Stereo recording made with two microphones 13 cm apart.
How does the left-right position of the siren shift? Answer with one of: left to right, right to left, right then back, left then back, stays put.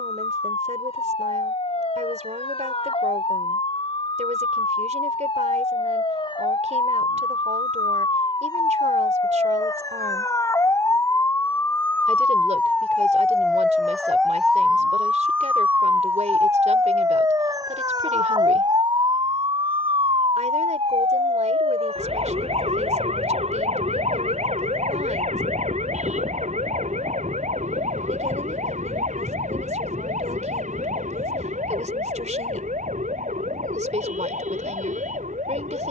left to right.